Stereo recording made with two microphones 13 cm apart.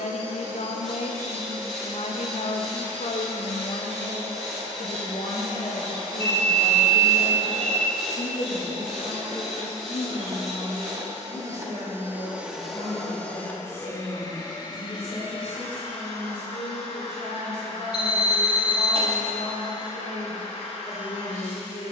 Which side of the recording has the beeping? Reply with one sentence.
In this clip you hear the beeping on the right.